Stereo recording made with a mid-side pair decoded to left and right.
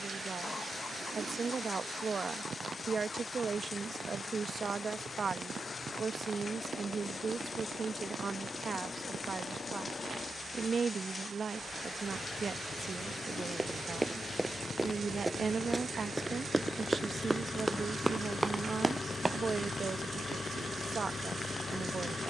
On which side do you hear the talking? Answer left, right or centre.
right.